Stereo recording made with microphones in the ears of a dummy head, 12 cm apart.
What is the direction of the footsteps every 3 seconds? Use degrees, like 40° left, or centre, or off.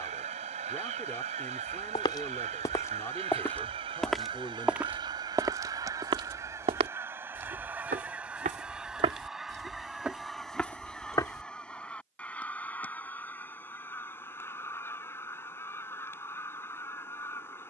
30° left, 10° right, 50° right, centre, off, off.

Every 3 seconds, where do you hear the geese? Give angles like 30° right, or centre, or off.
50° right, 40° right, 10° right, centre, 10° left, 20° left.